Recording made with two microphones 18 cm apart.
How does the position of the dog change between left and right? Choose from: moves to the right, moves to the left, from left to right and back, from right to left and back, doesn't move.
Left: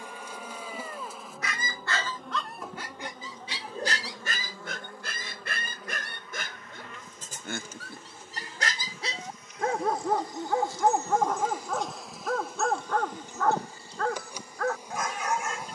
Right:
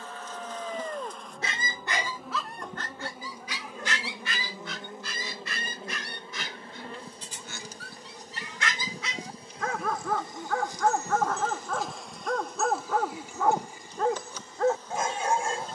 from right to left and back.